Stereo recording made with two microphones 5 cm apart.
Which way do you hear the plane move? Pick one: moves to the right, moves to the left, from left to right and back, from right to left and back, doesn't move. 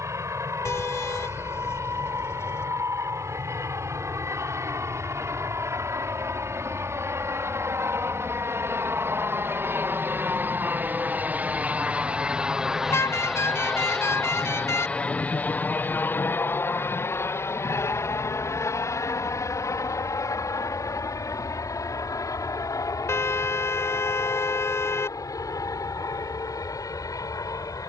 moves to the left.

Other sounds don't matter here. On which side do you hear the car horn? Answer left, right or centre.
left.